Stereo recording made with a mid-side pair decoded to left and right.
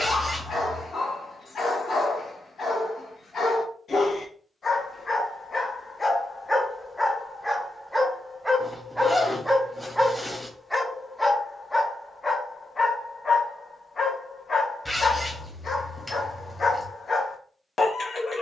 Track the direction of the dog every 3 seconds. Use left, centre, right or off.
left, left, centre, centre, left, left.